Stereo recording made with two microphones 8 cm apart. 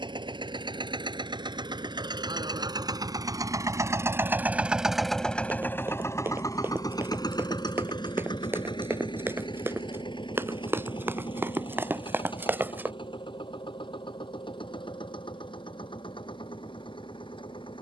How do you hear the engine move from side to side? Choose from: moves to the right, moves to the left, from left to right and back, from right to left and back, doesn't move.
moves to the left.